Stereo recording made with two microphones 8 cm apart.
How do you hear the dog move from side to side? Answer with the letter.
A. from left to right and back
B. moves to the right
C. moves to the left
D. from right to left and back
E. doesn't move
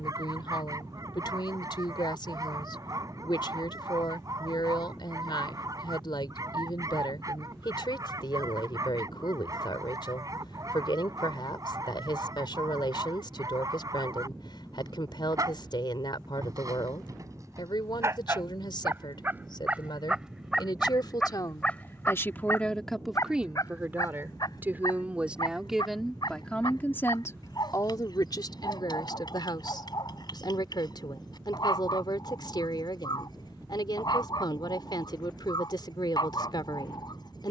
C.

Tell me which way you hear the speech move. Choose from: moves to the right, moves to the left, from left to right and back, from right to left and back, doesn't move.
from left to right and back.